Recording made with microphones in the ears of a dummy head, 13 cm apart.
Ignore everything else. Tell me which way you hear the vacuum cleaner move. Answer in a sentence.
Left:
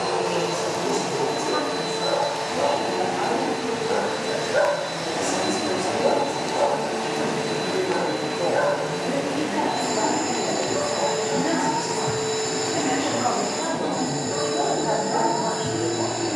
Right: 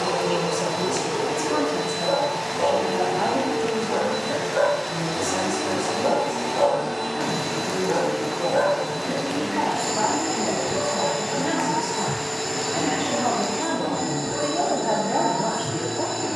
You can hear the vacuum cleaner stay in one place.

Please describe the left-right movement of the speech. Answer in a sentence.
In this clip you hear the speech move from right to left and back again.